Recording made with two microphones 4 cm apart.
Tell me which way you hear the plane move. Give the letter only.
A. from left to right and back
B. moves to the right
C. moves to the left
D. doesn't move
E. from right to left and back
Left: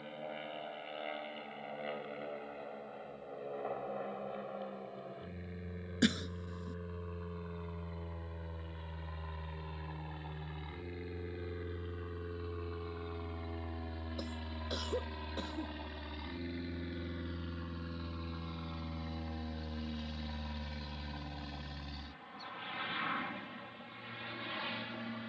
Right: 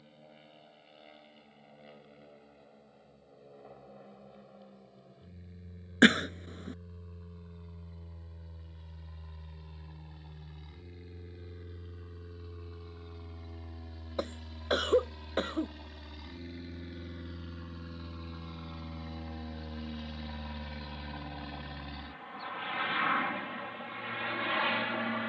B.